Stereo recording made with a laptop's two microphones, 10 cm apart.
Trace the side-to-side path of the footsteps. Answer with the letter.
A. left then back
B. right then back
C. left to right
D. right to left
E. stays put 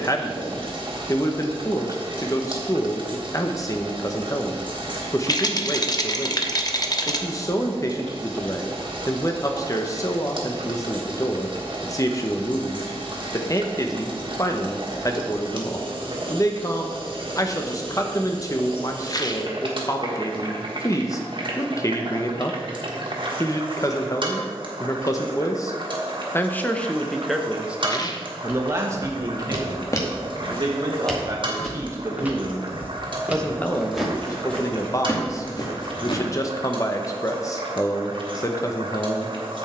B.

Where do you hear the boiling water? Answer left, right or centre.
right.